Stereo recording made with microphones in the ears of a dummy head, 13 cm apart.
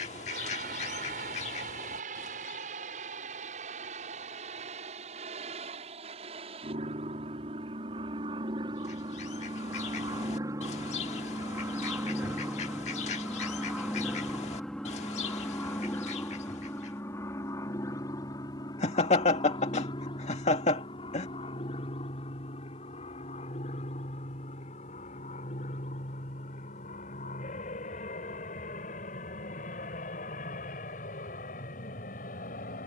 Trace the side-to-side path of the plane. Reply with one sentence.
In this clip you hear the plane go from the right side to the left.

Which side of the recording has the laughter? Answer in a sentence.
In this clip you hear the laughter on the left.